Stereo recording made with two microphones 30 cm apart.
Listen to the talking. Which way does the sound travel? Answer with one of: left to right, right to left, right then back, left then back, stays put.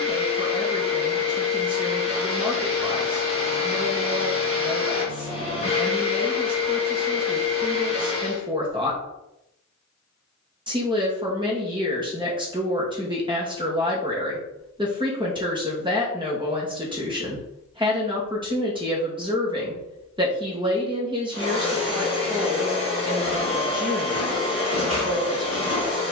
stays put.